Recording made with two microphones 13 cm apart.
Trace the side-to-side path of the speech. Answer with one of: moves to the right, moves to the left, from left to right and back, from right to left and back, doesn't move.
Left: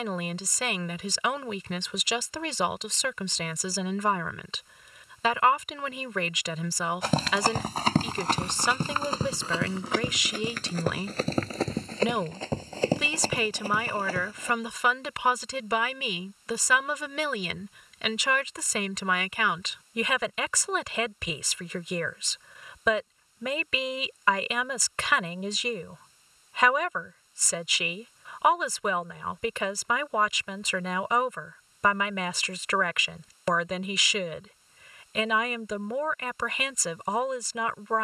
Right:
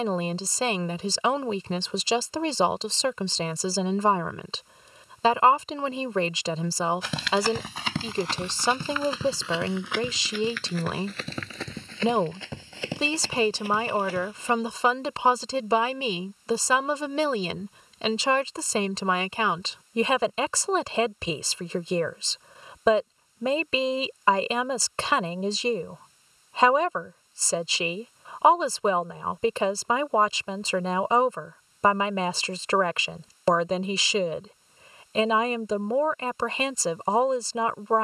doesn't move.